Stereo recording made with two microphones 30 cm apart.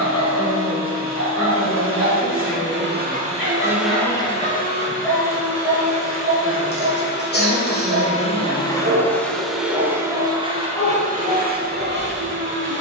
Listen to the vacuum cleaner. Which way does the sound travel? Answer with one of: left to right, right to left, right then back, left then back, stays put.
left then back.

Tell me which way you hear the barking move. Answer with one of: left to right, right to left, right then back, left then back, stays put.
right then back.